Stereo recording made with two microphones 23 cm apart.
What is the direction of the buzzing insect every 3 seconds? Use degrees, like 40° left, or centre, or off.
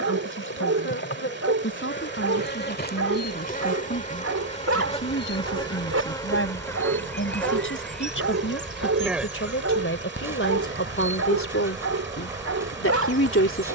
50° left, 30° left, 10° left, 10° right, 10° right.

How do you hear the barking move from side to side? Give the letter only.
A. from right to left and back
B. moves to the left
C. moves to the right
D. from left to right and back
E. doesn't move
E.